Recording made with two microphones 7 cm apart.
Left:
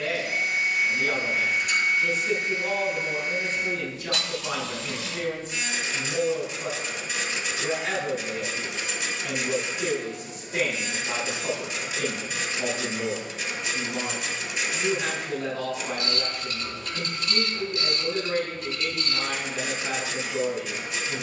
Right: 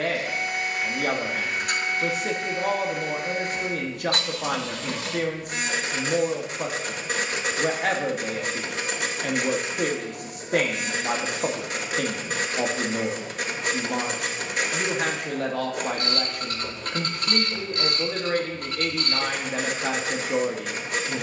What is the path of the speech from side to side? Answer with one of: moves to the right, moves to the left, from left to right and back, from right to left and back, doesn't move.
doesn't move.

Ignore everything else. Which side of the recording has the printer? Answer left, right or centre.
right.